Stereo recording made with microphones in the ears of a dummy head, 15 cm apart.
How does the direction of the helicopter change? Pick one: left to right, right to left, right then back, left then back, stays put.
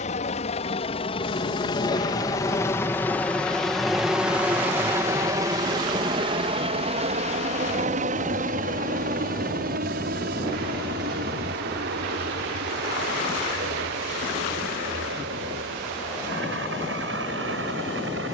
left to right.